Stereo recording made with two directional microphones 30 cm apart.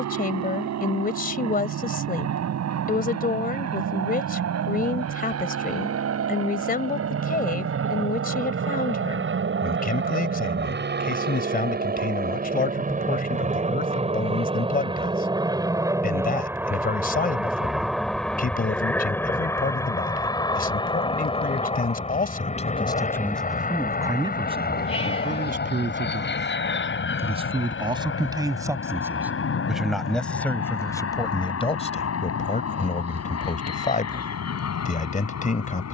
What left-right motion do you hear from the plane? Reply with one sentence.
In this clip you hear the plane go from the right side to the left.